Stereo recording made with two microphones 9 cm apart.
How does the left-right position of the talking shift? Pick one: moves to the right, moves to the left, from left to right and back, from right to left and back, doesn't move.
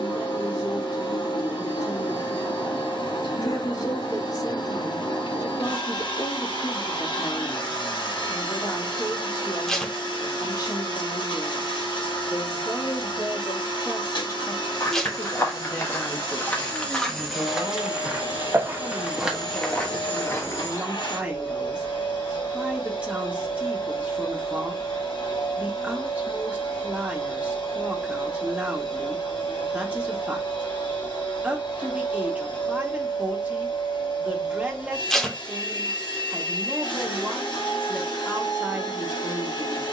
moves to the right.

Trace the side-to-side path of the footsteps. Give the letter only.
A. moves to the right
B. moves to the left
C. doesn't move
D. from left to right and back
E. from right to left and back
D.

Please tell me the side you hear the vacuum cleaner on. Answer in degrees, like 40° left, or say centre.
70° left.